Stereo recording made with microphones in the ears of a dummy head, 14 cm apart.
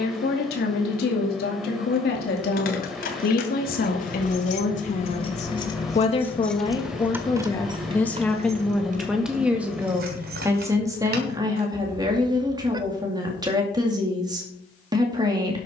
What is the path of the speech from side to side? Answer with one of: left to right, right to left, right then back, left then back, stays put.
left to right.